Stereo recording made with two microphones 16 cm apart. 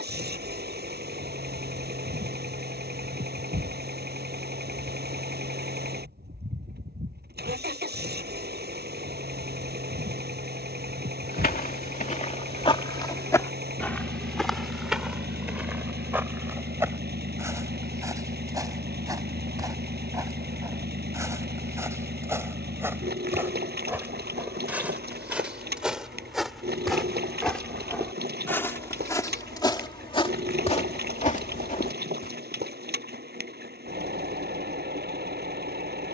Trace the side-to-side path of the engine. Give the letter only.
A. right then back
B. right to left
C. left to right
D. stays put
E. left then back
D.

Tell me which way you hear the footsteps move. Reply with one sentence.
You can hear the footsteps move from left to right and back again.